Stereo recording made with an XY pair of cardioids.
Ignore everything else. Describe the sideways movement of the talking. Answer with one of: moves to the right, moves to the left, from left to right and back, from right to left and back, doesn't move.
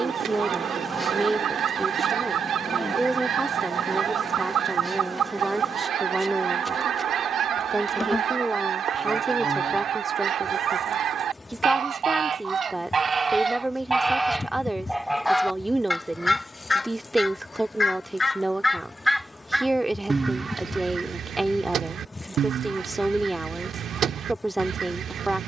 doesn't move.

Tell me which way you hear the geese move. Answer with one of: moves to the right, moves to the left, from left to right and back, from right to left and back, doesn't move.
from right to left and back.